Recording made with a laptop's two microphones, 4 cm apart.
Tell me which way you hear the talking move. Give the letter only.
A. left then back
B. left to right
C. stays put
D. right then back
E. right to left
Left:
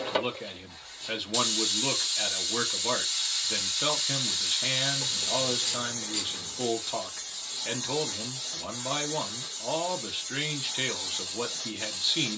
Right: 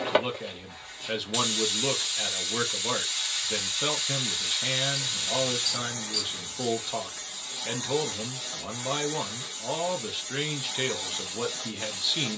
C.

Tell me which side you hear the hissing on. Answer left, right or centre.
right.